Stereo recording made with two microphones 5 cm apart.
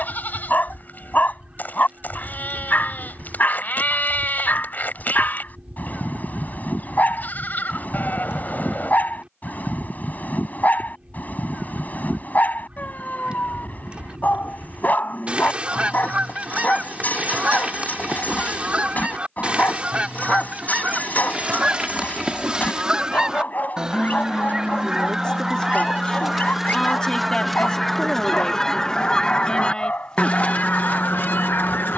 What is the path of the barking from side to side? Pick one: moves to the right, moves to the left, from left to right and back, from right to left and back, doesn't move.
doesn't move.